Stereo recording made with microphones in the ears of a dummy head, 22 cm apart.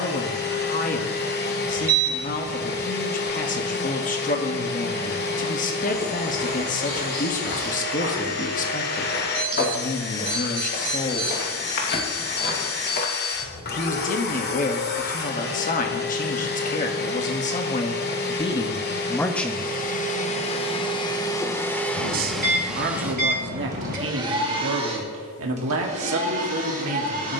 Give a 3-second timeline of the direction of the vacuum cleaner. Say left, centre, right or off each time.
left, left, left, left, left, left, left, centre, right.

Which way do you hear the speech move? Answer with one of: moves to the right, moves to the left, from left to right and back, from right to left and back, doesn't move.
moves to the right.